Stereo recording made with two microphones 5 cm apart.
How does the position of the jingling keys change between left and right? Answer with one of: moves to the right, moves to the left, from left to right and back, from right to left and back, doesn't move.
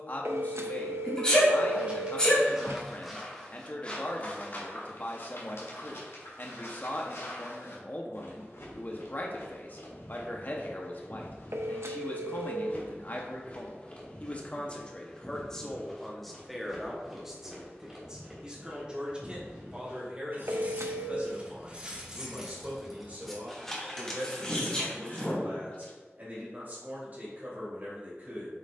moves to the left.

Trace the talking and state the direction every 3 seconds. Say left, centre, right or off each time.
left, left, left, left, left, centre, right, right, right, right.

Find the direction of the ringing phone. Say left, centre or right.
right.